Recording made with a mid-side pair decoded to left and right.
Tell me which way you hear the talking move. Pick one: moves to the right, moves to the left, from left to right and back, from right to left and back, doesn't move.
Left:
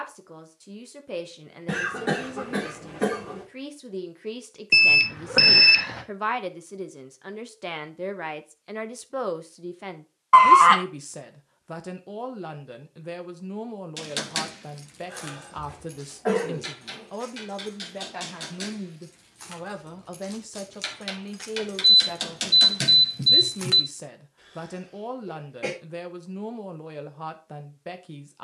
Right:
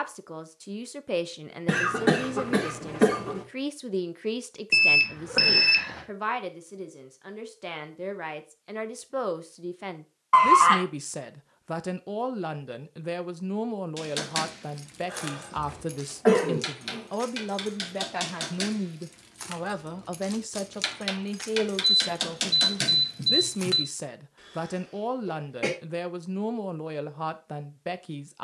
from right to left and back.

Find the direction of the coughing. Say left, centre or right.
right.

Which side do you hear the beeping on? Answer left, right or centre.
left.